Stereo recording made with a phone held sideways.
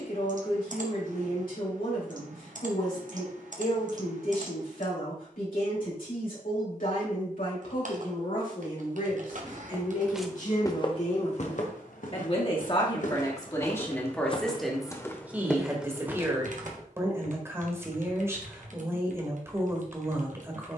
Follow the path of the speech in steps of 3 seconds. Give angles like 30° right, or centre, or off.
80° left, 80° left, 70° left, 60° left, 20° left, 20° right, 20° right.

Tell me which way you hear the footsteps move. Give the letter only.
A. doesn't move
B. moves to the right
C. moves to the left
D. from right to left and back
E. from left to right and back
D.